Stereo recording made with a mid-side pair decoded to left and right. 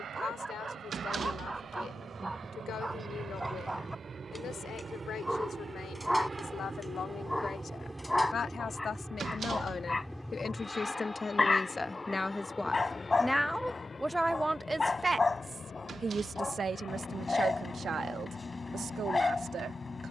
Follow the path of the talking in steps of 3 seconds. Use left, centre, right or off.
left, left, left, left, centre, right, right.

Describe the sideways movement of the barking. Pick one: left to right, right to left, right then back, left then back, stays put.
right to left.